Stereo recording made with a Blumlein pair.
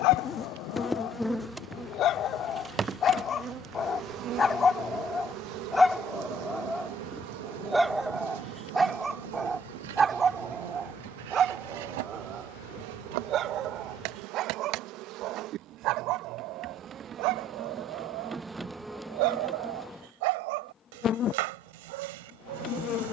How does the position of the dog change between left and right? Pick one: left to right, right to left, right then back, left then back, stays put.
left to right.